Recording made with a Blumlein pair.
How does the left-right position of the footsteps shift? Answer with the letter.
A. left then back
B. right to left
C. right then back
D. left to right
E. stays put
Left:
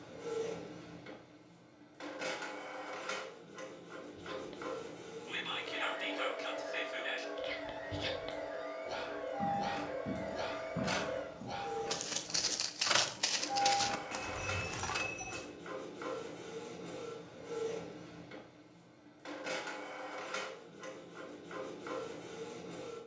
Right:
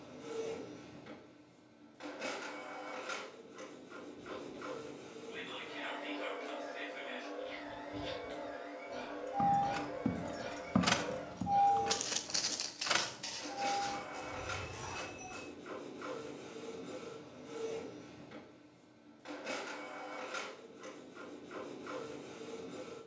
B.